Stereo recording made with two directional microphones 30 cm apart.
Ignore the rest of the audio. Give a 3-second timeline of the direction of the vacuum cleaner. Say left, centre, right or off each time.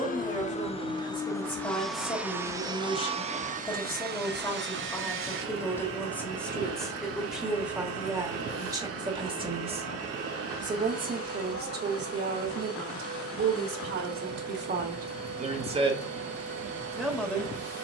centre, right, right, right, right, right.